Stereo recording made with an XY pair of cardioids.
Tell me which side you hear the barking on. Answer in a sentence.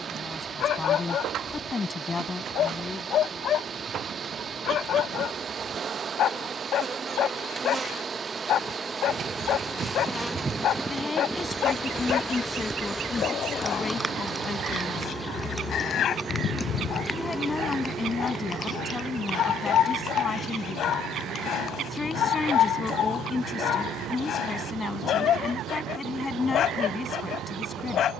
In this clip you hear the barking on the left.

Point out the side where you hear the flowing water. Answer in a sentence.
In this clip you hear the flowing water on the right.